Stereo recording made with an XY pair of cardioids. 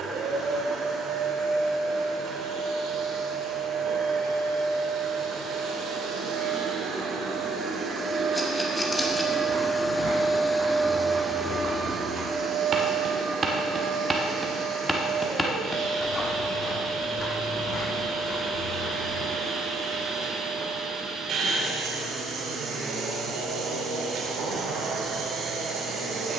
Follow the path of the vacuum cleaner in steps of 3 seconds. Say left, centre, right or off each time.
right, right, right, centre, right, right, right, right, right.